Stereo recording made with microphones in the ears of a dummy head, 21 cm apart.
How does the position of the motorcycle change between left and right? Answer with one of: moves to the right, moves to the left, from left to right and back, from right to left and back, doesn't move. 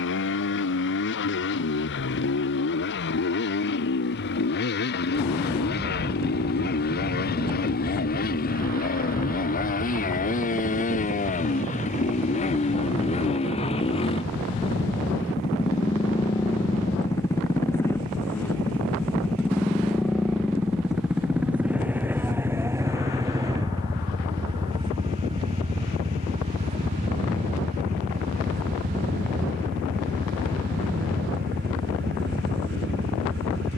moves to the right.